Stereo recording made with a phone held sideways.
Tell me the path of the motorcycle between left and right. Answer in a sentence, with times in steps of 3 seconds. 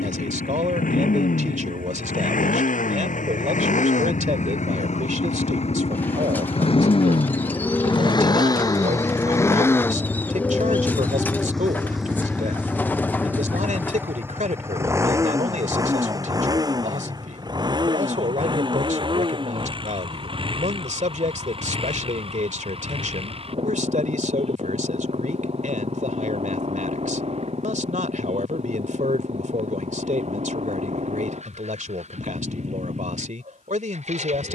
You can hear the motorcycle on the left from 0 s, in the centre from 9 s and on the right from 15 s.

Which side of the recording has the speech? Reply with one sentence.
You can hear the speech on the right.